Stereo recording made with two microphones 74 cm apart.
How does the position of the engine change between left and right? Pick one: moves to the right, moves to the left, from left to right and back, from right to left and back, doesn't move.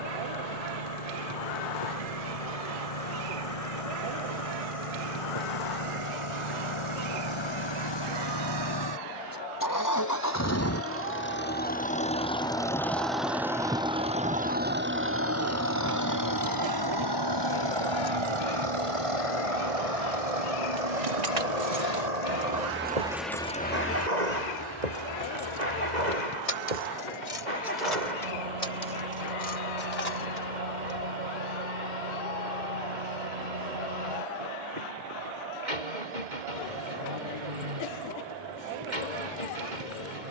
moves to the right.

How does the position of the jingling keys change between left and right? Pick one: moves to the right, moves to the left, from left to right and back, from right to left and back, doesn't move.
moves to the left.